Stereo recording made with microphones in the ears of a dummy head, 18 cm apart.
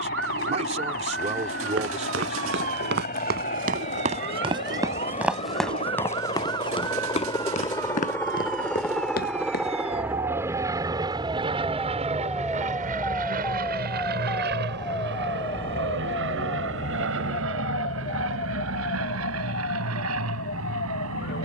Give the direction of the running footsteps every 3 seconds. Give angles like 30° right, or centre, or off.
60° right, 30° right, 30° left, 50° left, off, off, off.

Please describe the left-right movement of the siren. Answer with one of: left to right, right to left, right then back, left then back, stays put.
right to left.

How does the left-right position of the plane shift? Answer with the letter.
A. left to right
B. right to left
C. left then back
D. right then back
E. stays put
A.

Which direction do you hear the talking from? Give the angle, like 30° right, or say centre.
40° right.